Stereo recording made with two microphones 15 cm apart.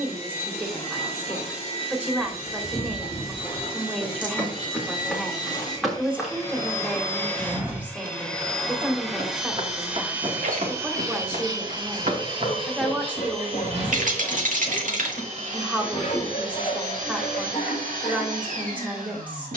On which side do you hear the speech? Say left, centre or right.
centre.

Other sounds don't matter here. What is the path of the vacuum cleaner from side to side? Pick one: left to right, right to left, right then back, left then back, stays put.
left to right.